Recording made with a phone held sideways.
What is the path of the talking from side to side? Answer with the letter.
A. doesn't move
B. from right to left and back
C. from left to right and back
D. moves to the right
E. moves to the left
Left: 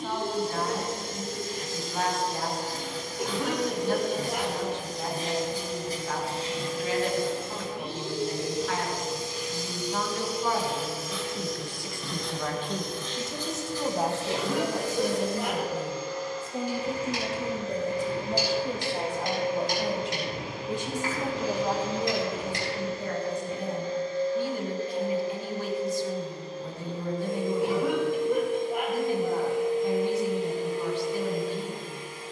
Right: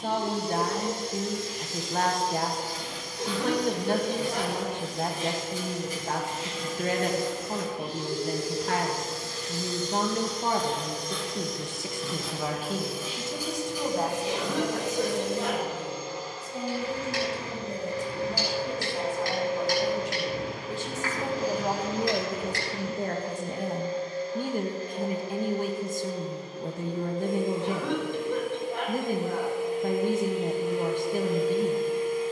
B.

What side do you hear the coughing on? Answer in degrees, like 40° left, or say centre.
10° left.